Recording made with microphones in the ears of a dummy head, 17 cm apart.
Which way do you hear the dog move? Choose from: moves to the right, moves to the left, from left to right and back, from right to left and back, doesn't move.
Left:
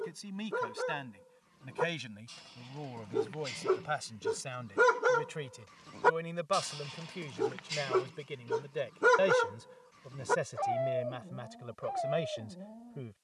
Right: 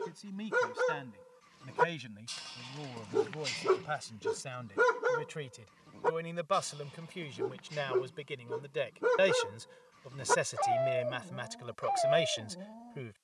from right to left and back.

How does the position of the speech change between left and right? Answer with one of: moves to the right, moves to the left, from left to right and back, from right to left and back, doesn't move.
moves to the right.